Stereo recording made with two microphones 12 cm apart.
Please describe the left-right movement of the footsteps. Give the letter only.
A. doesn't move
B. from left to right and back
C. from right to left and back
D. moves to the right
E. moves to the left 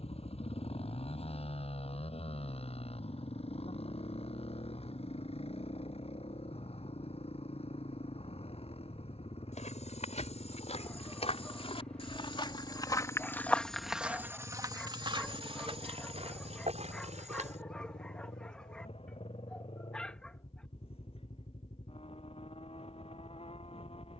D.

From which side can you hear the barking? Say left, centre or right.
centre.